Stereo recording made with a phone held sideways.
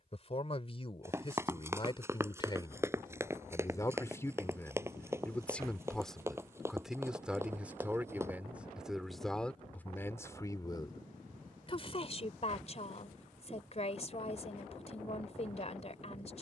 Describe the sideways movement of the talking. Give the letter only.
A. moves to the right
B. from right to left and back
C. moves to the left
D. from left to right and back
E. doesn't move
D.